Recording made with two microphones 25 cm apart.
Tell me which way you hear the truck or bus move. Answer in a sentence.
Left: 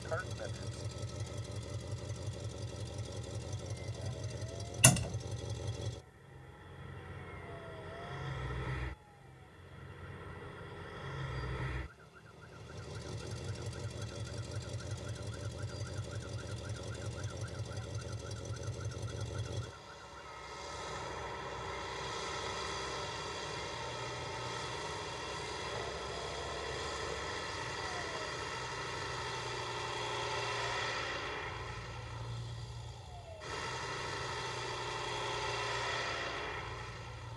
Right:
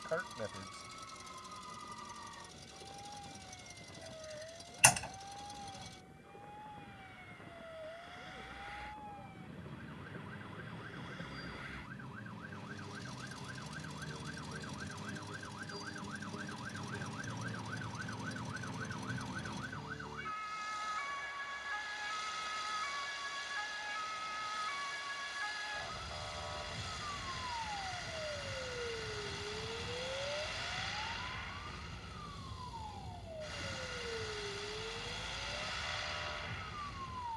In this clip you hear the truck or bus stay put.